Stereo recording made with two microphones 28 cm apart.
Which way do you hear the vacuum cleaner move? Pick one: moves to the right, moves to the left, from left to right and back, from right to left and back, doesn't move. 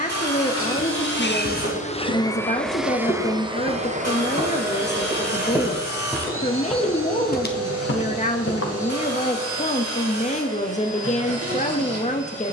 moves to the right.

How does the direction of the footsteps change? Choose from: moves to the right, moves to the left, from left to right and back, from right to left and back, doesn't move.
moves to the left.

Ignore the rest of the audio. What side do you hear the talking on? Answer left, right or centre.
left.